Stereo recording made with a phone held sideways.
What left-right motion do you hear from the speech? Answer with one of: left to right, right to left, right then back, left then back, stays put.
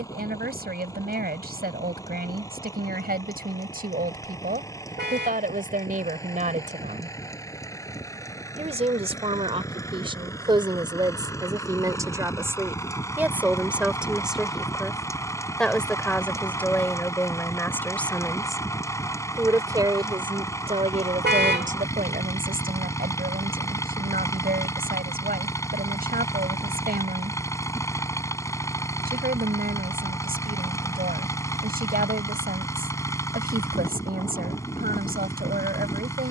left then back.